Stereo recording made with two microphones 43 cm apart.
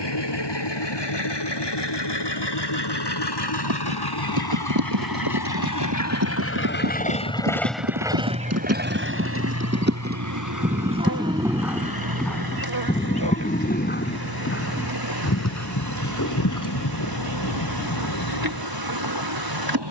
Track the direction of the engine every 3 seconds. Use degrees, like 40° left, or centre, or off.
80° left, 60° left, 10° left, 50° right, 60° right, 70° right, 70° right.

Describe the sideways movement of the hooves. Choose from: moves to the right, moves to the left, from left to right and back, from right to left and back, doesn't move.
moves to the left.